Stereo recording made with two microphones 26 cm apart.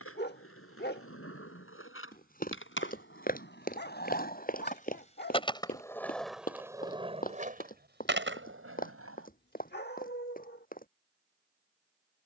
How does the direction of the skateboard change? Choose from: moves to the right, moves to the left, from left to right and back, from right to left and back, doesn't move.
moves to the right.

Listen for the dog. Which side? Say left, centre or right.
left.